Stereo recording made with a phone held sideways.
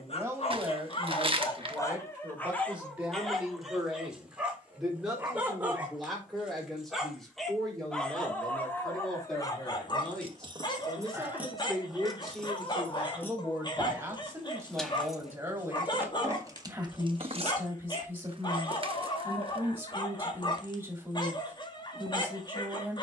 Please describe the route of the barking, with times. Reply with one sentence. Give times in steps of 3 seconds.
In this clip you hear the barking on the left from 0 s, in the centre from 3 s and on the left from 9 s.